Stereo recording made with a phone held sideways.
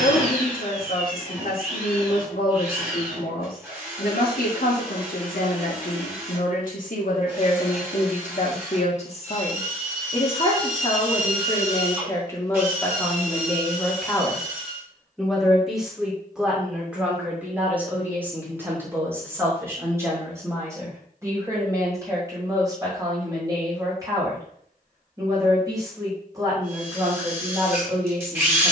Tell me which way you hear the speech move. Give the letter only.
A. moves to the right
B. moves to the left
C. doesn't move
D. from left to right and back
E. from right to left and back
A.